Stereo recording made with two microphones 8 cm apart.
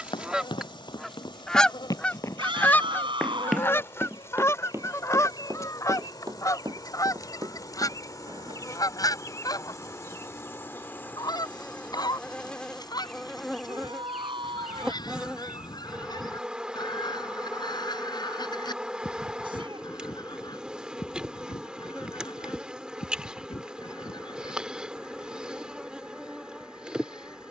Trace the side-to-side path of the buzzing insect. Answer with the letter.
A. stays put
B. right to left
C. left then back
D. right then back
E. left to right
E.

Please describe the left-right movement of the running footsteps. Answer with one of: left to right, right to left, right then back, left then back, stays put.
left to right.